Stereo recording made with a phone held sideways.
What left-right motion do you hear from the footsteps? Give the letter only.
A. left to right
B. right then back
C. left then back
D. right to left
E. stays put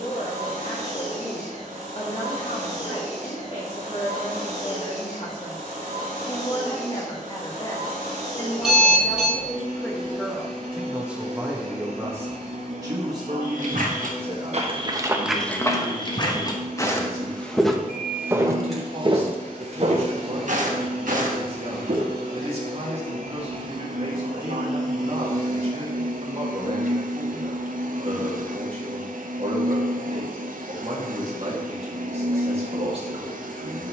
C.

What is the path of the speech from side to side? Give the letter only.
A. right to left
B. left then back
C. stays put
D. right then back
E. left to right
E.